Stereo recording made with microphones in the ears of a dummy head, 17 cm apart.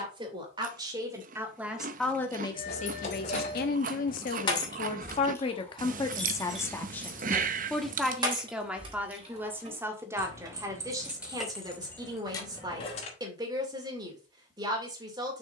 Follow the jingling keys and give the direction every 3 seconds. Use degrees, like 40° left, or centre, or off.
50° left, 30° left, 20° right, 20° right, 30° left.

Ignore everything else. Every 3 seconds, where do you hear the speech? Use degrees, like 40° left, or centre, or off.
centre, 40° left, 10° left, 20° right, 20° right.